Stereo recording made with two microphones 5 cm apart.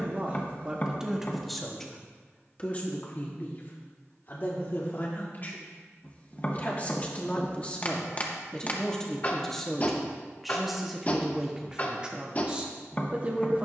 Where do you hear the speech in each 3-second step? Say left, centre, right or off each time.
centre, left, left, centre, right.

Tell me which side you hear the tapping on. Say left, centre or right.
left.